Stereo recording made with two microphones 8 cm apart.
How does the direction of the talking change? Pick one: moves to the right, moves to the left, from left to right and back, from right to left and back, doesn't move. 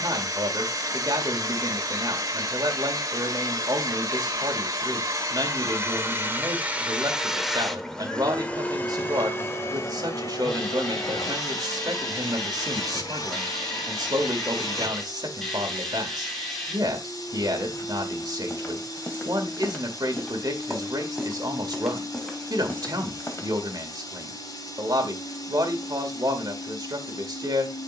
doesn't move.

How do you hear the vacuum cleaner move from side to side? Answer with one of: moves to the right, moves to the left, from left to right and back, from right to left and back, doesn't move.
moves to the left.